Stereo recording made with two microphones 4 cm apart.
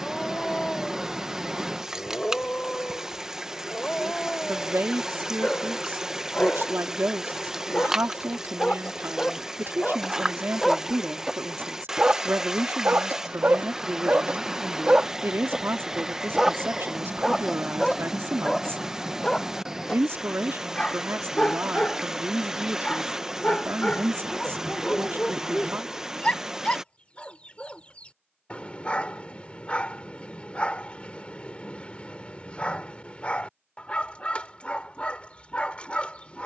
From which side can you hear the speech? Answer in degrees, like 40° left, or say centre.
60° right.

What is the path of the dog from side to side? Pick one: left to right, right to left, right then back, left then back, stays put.
right then back.